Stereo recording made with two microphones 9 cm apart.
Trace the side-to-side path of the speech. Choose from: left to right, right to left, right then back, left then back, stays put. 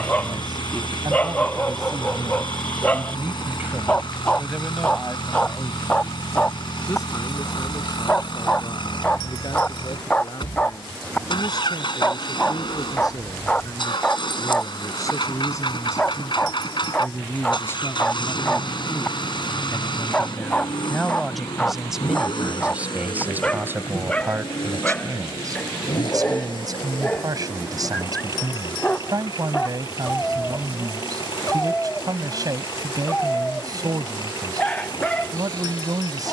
left then back.